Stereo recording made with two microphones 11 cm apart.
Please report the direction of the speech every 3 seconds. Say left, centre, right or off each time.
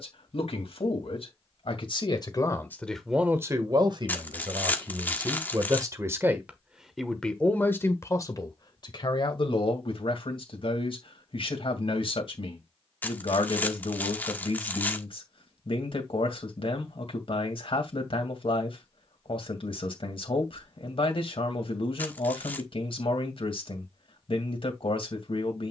left, right, centre, left, left, left, left, left, left.